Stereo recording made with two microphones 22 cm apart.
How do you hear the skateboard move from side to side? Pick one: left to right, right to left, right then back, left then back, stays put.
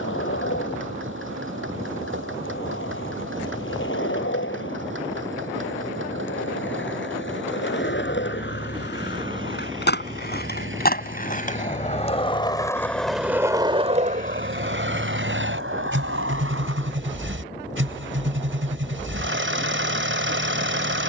left to right.